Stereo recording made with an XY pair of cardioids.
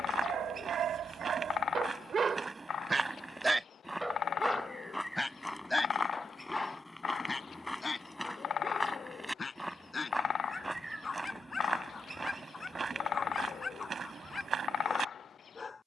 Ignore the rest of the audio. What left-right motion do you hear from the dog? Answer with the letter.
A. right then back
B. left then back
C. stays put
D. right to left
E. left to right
D.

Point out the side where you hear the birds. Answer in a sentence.
In this clip you hear the birds on the left.